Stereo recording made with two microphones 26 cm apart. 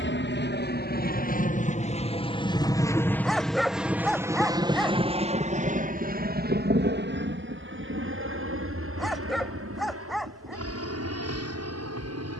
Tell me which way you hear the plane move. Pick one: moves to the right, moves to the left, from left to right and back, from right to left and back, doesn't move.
moves to the right.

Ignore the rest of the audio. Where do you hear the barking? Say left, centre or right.
centre.